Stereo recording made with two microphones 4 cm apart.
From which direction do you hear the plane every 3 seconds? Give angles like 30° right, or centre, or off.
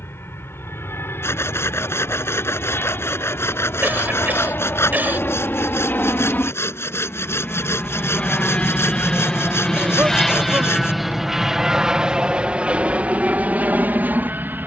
70° left, 60° left, 40° left, centre, 30° right.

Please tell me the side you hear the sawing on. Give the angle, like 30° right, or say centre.
70° left.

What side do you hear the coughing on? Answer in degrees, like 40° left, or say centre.
40° right.